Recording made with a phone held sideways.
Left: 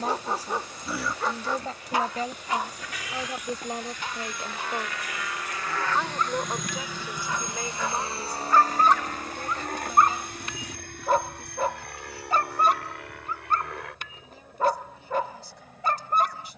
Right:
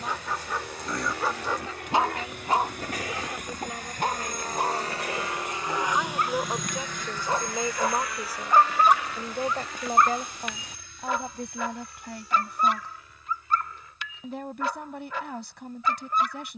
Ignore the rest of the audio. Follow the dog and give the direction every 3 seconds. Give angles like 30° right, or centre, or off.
10° right, 50° right, 30° right, 30° left, 40° left, 40° left.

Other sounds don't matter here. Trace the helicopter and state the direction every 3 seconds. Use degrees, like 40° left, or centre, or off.
70° right, 40° right, 20° left, 50° left, 60° left, 70° left.